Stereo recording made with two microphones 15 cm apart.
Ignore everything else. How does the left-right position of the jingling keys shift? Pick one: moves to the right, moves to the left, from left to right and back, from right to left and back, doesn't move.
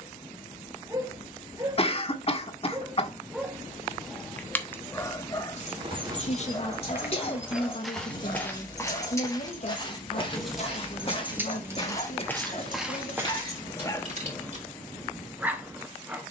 moves to the right.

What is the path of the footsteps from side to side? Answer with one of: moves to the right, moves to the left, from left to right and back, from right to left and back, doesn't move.
from right to left and back.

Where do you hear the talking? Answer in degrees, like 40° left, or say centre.
50° left.